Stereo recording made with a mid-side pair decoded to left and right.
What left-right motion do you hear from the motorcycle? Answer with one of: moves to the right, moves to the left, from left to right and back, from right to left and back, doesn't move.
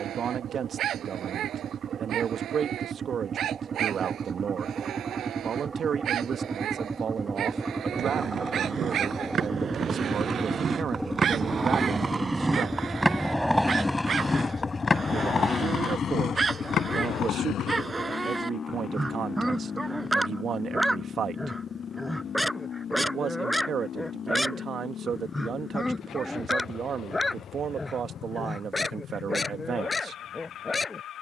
moves to the left.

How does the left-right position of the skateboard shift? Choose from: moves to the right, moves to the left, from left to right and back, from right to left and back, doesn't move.
moves to the left.